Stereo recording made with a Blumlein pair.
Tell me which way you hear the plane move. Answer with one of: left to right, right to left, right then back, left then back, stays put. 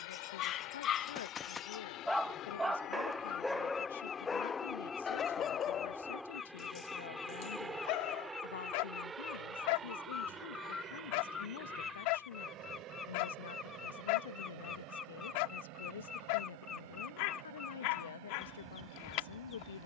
left to right.